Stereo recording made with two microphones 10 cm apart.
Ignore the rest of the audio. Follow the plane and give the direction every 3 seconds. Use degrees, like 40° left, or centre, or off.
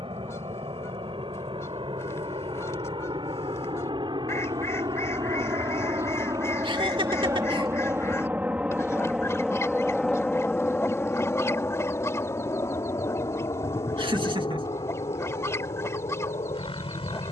70° right, 50° right, 30° right, 10° left, 40° left, 50° left.